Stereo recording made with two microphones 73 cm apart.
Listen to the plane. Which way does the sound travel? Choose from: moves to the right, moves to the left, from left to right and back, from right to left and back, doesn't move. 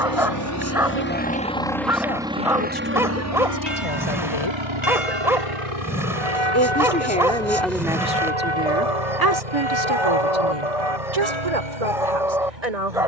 moves to the right.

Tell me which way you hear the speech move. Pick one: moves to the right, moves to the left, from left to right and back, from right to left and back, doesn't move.
moves to the right.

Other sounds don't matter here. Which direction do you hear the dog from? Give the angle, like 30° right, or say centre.
centre.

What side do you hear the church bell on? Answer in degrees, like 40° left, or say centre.
40° left.